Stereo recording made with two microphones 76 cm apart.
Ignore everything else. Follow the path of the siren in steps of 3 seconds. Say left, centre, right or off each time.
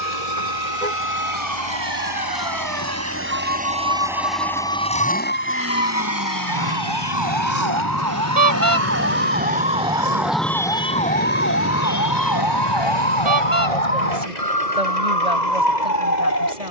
right, right, right, centre, left, left.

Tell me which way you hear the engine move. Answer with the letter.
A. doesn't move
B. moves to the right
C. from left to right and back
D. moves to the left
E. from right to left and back
D.